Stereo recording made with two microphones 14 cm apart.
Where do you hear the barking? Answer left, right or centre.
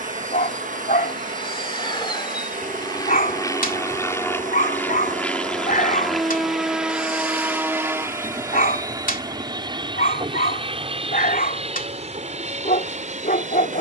left.